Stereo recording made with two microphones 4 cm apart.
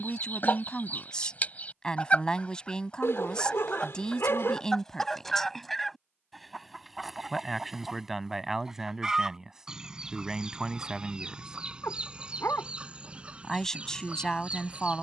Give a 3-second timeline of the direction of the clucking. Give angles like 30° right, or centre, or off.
40° left, 10° left, 10° right, 20° right, 30° right.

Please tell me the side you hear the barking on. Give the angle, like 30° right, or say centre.
70° left.